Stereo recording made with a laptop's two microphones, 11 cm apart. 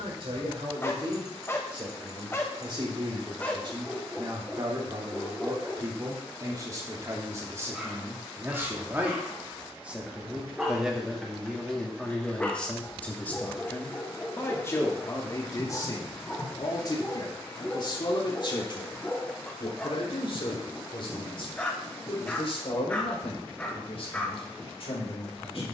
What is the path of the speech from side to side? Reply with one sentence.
In this clip you hear the speech go from the right side to the left.